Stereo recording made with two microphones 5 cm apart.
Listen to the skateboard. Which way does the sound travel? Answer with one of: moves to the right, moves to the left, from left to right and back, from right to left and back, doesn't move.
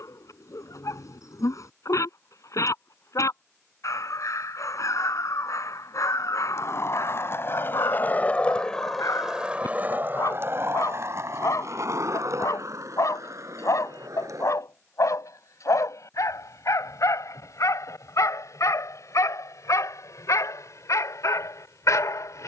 moves to the right.